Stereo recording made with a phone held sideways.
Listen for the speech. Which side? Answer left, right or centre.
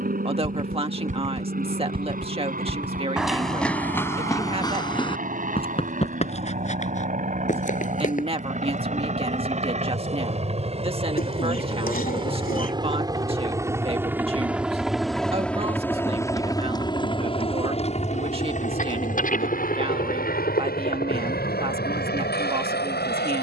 right.